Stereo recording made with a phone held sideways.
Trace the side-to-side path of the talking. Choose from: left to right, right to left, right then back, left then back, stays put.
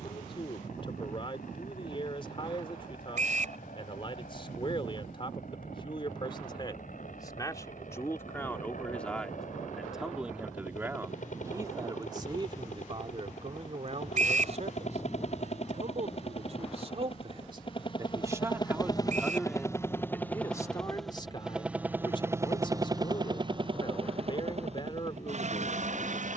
right then back.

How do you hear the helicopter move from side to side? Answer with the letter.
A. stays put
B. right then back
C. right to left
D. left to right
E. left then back
D.